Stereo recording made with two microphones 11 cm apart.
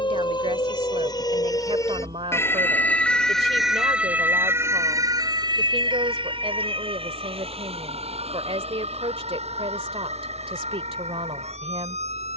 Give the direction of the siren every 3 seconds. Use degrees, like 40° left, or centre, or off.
30° left, 20° right, 60° right, 80° right.